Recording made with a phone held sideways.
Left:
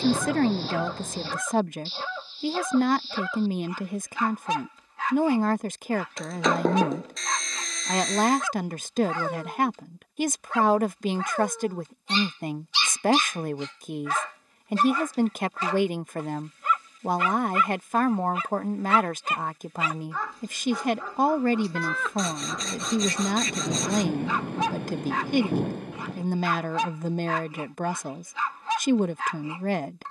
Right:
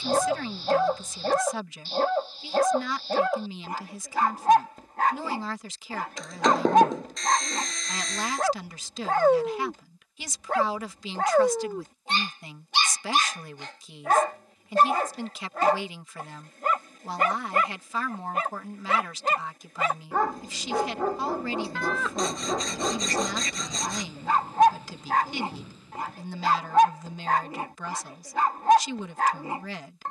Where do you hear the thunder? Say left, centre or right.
left.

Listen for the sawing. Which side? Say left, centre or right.
centre.